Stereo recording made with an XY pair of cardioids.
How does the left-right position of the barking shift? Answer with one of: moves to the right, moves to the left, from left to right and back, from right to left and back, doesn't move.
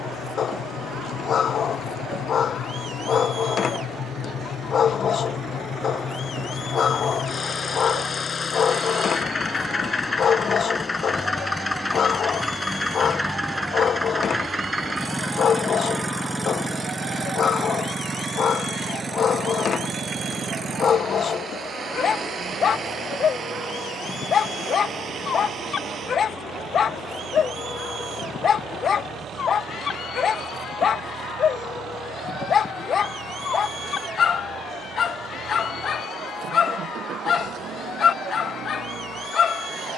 doesn't move.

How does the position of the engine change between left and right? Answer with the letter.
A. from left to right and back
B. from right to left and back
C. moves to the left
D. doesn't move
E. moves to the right
E.